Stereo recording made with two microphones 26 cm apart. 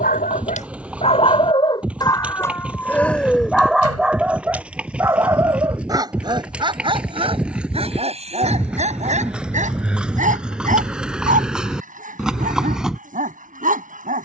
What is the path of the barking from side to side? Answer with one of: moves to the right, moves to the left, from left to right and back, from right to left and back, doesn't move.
moves to the right.